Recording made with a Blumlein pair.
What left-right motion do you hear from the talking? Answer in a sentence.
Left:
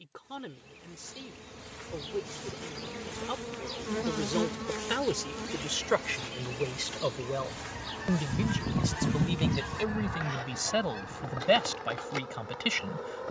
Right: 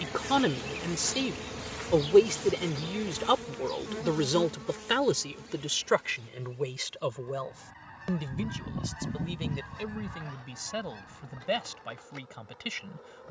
You can hear the talking move to the left.